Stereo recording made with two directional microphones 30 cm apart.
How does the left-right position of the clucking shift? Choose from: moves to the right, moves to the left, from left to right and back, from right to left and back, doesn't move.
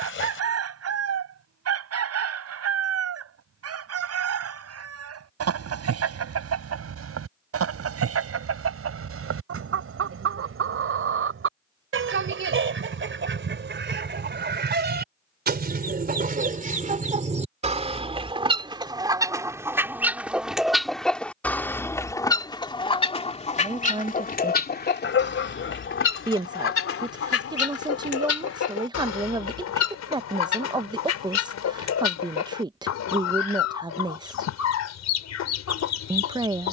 moves to the left.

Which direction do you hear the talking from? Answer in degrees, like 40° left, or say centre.
10° right.